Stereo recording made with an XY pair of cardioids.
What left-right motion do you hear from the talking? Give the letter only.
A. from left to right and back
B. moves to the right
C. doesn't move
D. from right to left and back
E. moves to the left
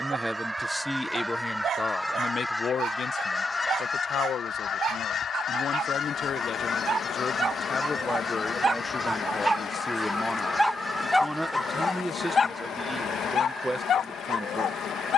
D.